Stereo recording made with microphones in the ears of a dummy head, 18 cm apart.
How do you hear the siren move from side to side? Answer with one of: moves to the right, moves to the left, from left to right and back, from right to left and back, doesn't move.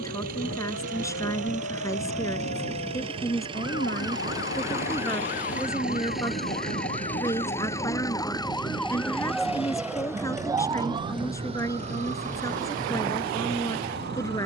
moves to the right.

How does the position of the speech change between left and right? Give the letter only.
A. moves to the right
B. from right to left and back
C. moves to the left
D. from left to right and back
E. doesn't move
E.